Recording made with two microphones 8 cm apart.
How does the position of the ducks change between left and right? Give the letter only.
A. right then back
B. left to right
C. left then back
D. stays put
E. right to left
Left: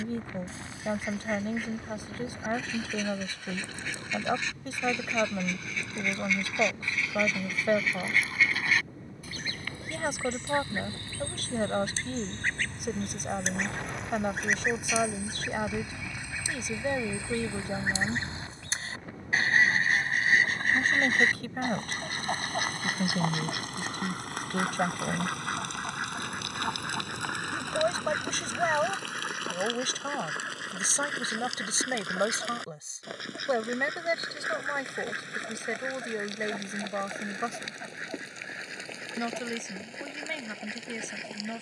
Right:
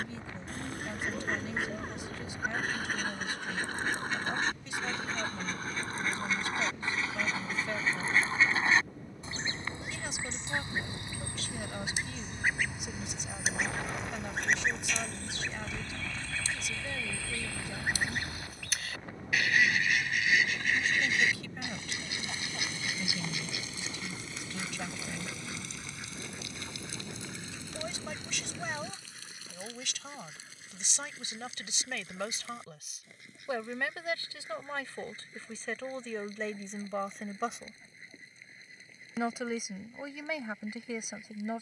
E.